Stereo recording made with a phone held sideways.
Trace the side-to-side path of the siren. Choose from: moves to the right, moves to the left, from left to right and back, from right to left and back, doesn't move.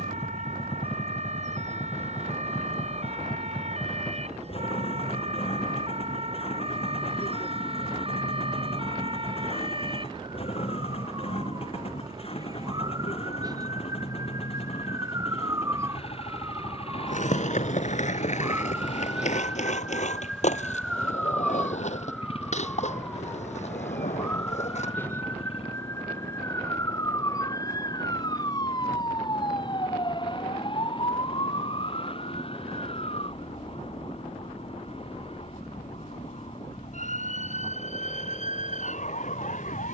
moves to the left.